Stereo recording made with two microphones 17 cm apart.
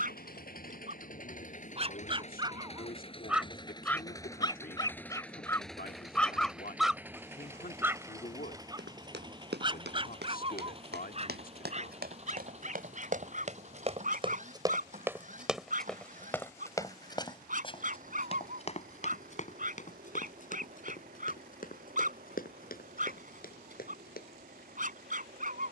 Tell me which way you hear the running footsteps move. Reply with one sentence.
In this clip you hear the running footsteps go from the right side to the left.